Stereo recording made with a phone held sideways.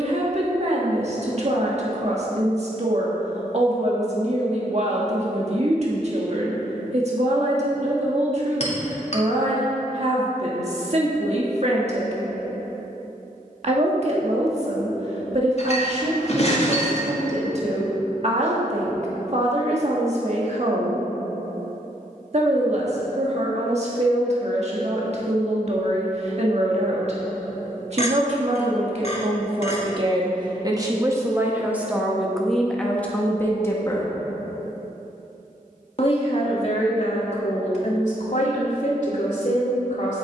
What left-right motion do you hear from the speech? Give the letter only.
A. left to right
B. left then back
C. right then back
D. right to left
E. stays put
D.